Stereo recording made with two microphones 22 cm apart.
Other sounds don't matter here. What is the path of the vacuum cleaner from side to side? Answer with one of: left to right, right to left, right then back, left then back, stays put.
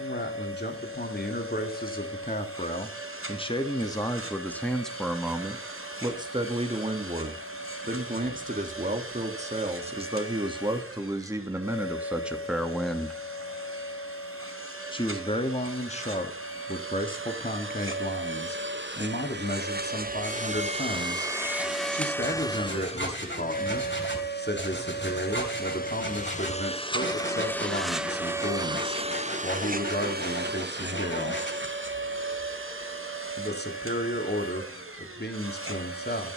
left then back.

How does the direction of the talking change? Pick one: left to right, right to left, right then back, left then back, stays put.
right then back.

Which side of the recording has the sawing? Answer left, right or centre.
left.